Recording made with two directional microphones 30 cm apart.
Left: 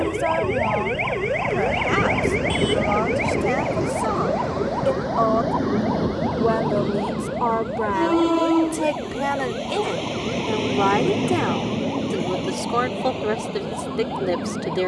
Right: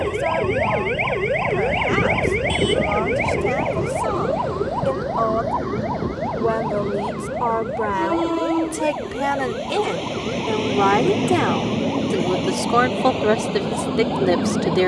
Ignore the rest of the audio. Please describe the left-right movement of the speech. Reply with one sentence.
You can hear the speech travel towards the right.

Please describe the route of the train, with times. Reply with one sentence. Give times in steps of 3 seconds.
In this clip you hear the train on the left from 0 s, in the centre from 9 s and on the right from 12 s.